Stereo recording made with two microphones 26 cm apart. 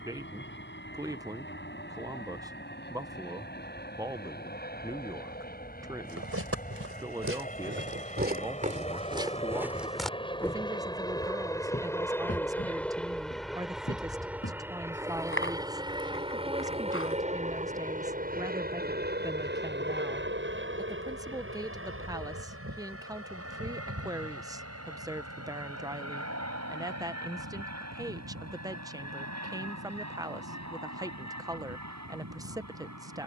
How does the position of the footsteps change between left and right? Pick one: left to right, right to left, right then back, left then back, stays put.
right to left.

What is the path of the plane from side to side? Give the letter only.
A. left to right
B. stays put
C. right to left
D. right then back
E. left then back
A.